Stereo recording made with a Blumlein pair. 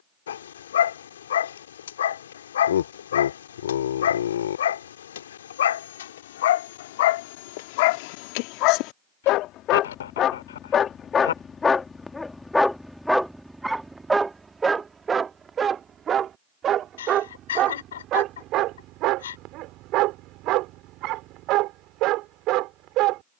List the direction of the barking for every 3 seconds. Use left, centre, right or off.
left, left, left, left, centre, right, right, right.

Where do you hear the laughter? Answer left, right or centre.
left.